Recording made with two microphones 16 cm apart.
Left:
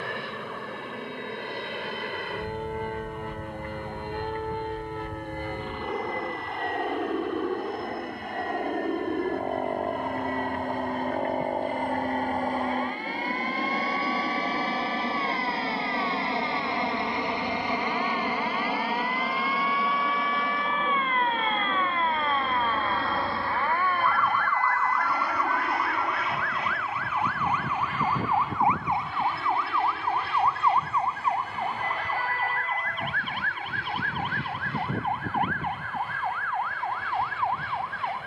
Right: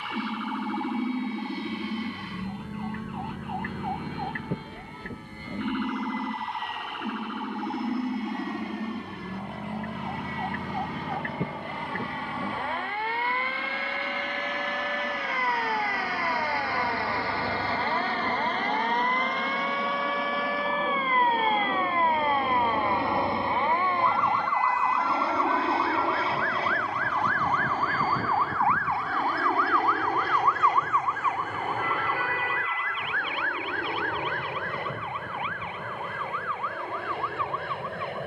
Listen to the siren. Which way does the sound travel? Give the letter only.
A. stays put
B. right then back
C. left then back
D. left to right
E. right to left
E.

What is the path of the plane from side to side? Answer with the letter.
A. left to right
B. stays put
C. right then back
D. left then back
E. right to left
A.